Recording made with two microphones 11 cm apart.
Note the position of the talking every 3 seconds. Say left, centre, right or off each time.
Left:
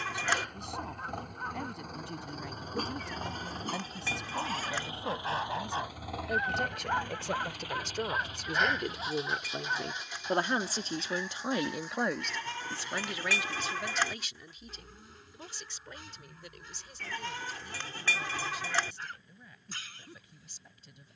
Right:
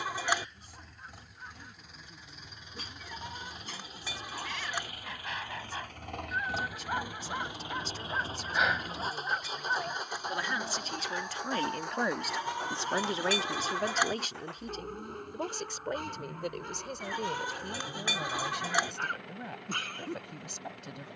left, left, left, left, right, right, right.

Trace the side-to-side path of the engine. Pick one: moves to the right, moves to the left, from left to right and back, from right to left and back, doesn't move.
moves to the right.